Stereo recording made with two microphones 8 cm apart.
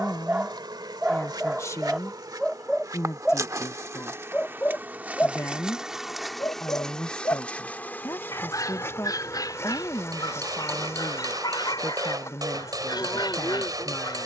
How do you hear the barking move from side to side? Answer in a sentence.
In this clip you hear the barking travel towards the left.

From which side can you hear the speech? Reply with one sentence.
In this clip you hear the speech on the left.